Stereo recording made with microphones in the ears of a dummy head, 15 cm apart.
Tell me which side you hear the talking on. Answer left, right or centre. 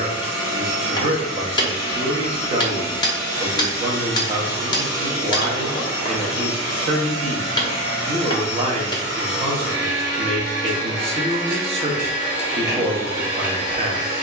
right.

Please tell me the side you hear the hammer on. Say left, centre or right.
left.